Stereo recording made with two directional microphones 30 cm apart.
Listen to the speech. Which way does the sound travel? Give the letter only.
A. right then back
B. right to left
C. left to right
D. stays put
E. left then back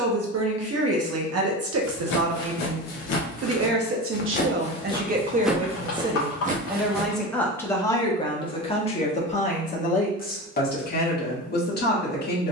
B.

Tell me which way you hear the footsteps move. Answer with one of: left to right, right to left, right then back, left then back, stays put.
left to right.